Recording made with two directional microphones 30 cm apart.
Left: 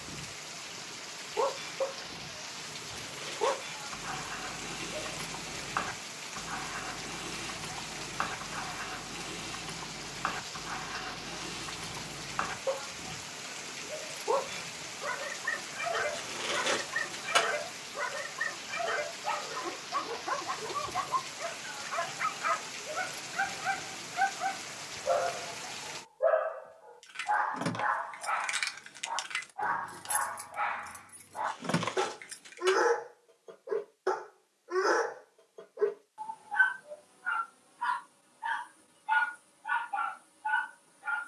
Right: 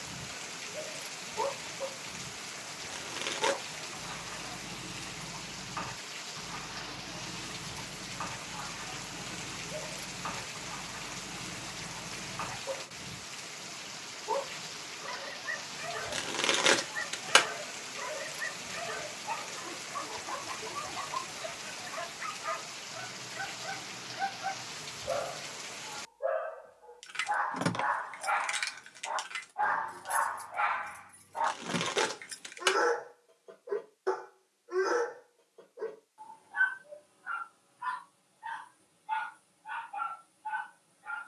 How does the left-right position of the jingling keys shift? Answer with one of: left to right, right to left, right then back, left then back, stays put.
left then back.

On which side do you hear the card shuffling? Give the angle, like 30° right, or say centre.
70° right.